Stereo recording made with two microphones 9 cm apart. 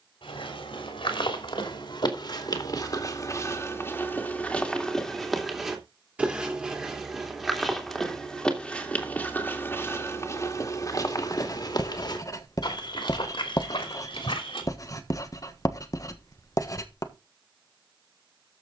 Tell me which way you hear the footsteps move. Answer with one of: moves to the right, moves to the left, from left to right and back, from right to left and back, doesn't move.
from left to right and back.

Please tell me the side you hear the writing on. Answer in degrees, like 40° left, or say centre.
40° left.